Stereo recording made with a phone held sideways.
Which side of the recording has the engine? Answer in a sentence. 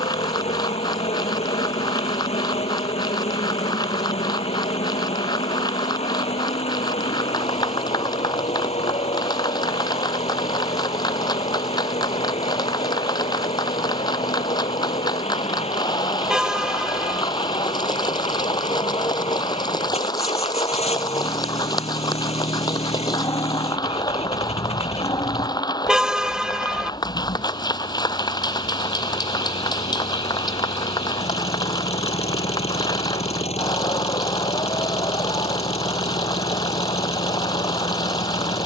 You can hear the engine on the left.